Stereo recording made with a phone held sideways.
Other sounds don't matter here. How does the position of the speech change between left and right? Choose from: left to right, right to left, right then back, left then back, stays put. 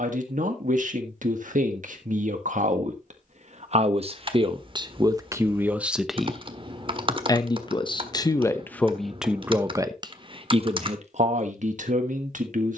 left then back.